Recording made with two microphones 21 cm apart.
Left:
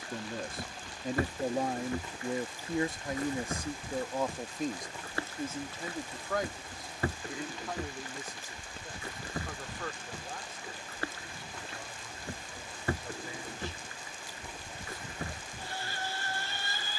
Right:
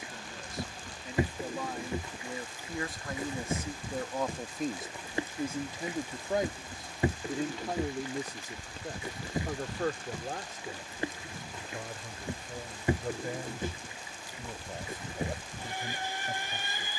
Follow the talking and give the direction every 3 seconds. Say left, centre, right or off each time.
left, centre, right, right, right, right.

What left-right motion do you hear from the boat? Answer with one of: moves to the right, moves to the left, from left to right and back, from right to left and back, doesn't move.
doesn't move.